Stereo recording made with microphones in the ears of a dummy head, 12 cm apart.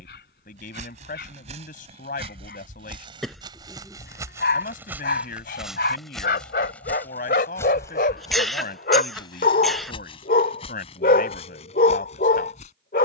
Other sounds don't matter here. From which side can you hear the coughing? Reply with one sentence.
You can hear the coughing in the centre.